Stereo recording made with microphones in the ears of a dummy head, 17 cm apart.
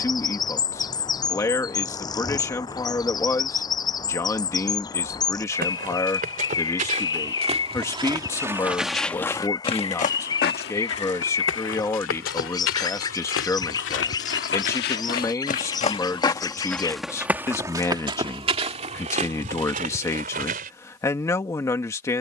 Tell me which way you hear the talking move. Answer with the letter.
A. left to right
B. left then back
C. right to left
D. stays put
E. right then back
D.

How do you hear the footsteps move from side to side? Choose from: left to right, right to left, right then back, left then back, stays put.
left then back.